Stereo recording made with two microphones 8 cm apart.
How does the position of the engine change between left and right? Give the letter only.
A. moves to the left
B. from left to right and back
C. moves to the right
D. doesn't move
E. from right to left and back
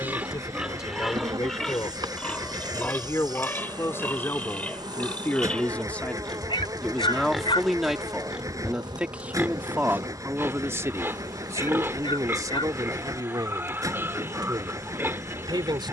D.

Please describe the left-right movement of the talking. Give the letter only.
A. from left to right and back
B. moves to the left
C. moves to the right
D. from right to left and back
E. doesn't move
C.